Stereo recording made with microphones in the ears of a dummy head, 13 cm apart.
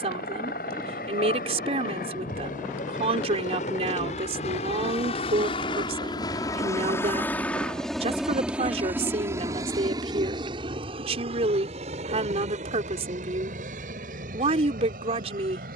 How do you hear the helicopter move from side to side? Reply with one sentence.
You can hear the helicopter move to the right.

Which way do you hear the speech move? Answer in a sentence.
You can hear the speech stay in one place.